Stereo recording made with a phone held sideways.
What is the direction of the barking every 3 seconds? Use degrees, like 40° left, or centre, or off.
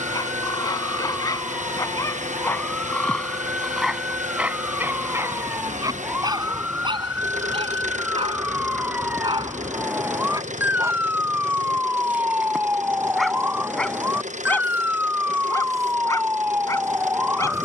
20° left, 10° right, 40° right, 20° right, centre, 20° left.